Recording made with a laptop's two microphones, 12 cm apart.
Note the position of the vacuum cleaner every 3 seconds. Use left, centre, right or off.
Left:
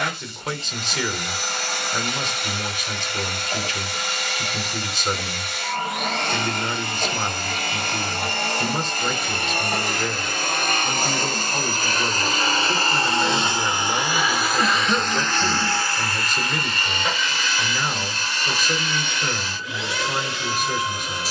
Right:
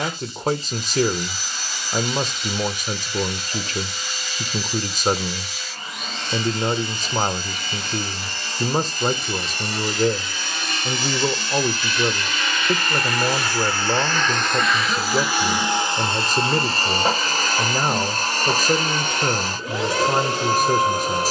left, left, left, left, left, right, right.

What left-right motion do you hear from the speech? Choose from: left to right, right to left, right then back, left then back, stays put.
stays put.